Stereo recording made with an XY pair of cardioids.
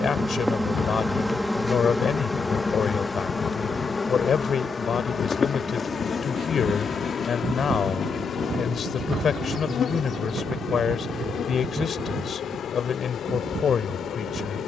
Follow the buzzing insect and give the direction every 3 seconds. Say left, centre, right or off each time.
centre, left, left, left, left.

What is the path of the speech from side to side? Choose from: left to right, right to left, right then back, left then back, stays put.
stays put.